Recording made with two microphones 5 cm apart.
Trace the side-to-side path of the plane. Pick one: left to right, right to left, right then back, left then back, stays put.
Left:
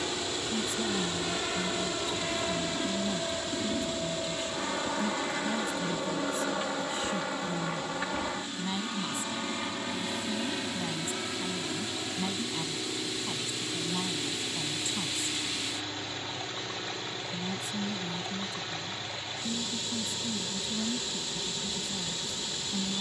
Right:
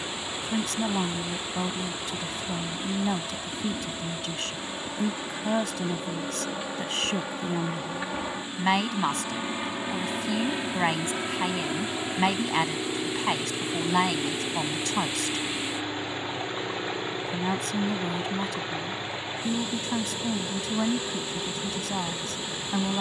left to right.